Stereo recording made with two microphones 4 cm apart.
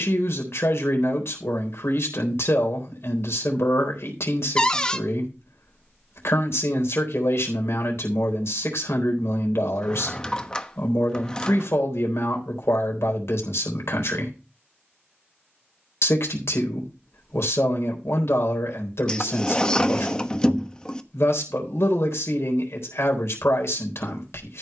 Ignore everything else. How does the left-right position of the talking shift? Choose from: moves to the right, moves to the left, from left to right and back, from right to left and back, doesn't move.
doesn't move.